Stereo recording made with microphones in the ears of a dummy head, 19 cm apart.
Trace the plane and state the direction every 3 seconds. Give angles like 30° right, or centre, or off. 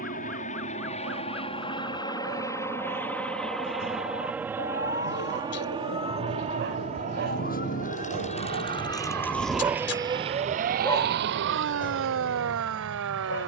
30° left, 10° right, 40° right, 50° right, 60° right.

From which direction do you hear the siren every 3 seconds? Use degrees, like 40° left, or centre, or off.
70° left, 60° left, 40° left, 30° right, 70° right.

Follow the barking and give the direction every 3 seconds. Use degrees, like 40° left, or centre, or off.
70° right, 70° right, 50° right, centre, 50° left.